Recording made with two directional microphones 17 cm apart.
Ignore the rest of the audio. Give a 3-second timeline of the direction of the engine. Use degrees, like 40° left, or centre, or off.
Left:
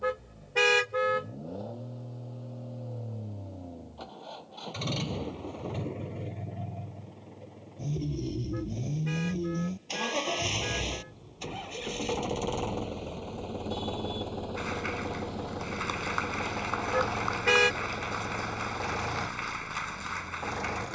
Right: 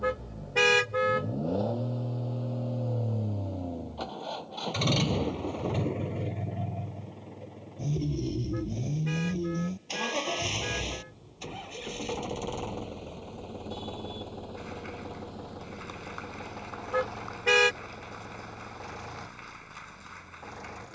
50° right, 40° right, 20° right, 10° left, 30° left, 40° left, 50° left.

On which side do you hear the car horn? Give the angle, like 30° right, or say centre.
centre.